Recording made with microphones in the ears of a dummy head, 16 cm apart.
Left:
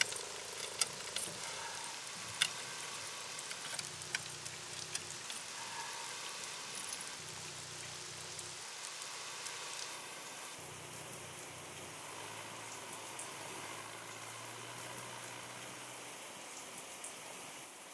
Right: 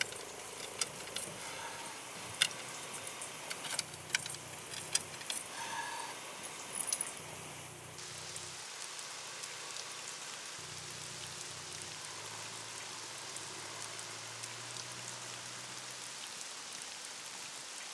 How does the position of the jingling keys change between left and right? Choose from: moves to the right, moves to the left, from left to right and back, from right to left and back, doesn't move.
moves to the right.